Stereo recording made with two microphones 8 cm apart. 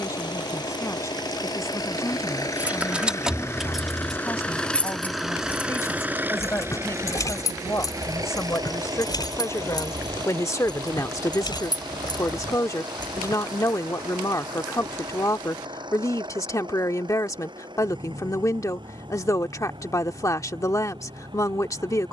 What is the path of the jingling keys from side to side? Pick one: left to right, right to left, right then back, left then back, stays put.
right to left.